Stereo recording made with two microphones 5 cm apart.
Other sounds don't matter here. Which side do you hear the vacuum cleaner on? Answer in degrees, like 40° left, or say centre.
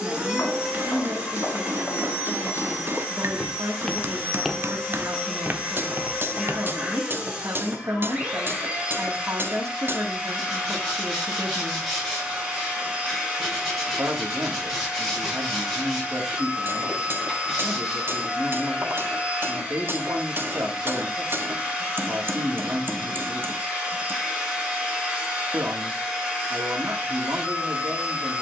10° right.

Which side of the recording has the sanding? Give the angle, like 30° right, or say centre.
10° left.